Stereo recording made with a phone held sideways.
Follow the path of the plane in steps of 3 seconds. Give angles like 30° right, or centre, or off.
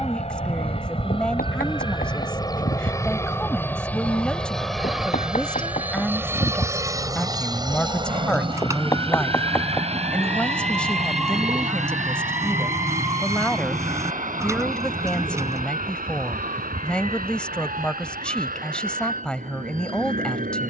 30° left, centre, 20° right, 40° right, 50° right, 60° right, 60° right.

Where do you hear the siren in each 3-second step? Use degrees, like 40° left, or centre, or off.
70° left, 50° left, 40° left, 10° left, 20° right, 40° right, 50° right.